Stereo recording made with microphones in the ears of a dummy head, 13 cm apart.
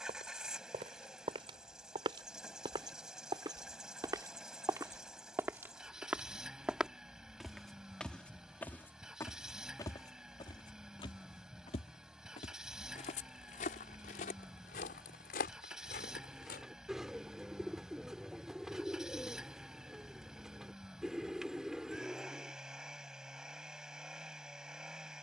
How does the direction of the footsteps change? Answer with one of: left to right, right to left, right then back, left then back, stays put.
right to left.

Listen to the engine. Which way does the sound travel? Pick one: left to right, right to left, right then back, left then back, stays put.
stays put.